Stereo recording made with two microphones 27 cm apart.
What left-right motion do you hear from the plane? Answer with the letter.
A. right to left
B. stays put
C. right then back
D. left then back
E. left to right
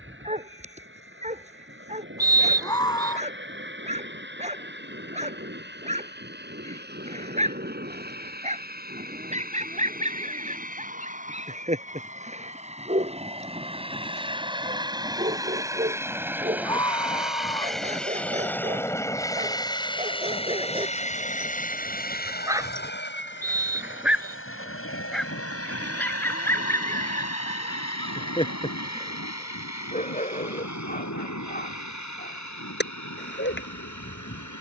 A.